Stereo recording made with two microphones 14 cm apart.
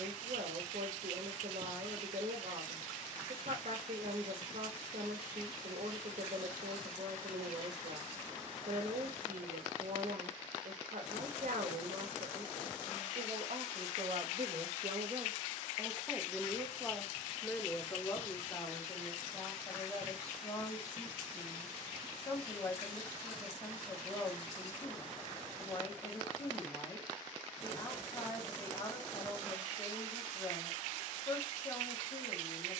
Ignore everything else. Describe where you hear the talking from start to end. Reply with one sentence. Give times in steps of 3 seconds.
You can hear the talking on the right from 0 s, in the centre from 15 s and on the left from 18 s.